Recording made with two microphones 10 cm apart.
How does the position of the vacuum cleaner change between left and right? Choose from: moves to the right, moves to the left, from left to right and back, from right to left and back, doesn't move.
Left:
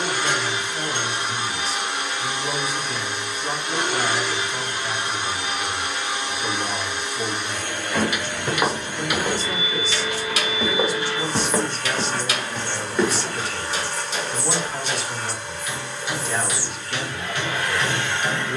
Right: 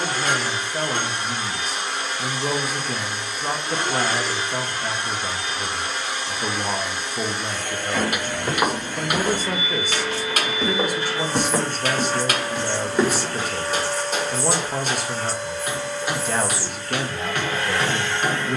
doesn't move.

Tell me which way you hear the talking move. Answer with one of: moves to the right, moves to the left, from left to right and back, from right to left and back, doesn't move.
doesn't move.